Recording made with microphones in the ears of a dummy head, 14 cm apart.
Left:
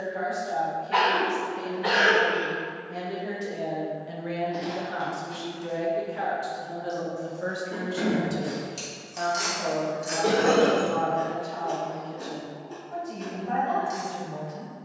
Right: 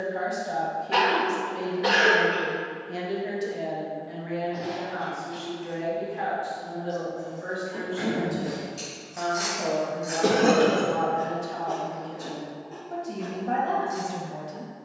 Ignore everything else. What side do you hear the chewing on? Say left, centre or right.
left.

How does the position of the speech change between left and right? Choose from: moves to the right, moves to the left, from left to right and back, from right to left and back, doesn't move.
from right to left and back.